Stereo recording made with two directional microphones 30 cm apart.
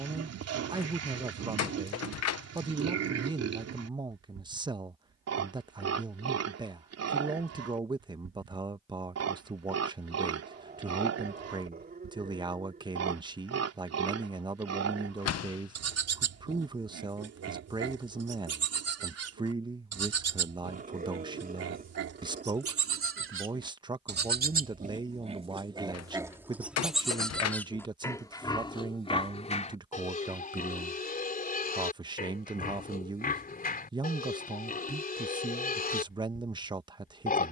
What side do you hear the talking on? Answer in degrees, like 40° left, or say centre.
10° right.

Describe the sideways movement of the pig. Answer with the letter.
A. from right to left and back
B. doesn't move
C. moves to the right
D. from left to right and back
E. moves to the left
E.